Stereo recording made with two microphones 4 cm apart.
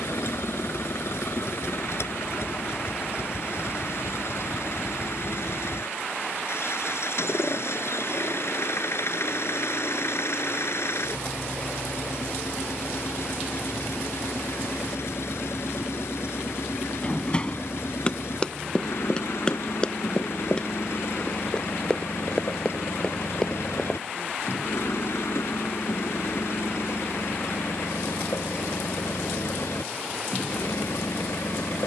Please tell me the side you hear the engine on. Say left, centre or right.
left.